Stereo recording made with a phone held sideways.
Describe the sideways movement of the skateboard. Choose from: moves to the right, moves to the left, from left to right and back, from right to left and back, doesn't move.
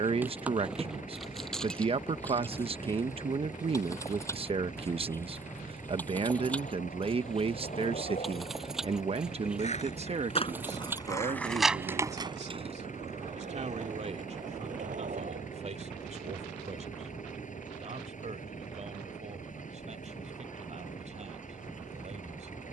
moves to the right.